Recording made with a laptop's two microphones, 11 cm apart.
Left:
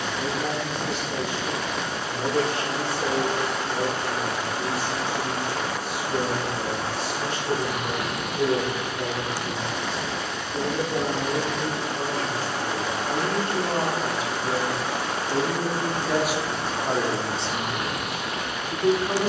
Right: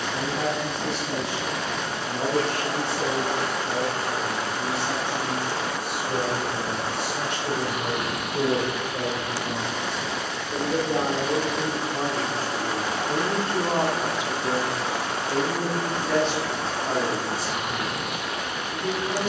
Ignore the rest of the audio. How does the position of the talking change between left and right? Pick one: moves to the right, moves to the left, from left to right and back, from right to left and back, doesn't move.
moves to the left.